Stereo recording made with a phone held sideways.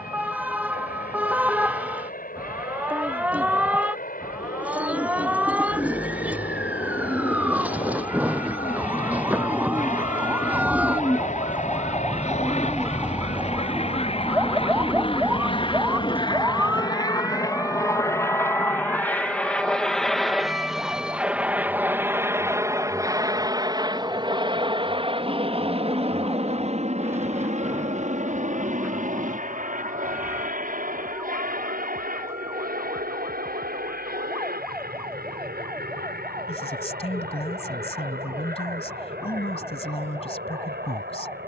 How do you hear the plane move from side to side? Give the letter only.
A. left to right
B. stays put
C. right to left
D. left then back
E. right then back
A.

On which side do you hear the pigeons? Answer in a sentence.
In this clip you hear the pigeons in the centre.